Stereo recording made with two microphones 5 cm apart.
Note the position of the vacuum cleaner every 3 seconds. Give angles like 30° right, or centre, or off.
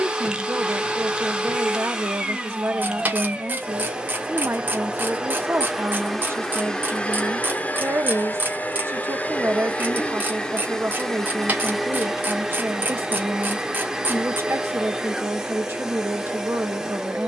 20° right, 20° right, 20° left, 10° left, 10° right, 10° right.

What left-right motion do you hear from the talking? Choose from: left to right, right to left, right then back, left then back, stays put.
stays put.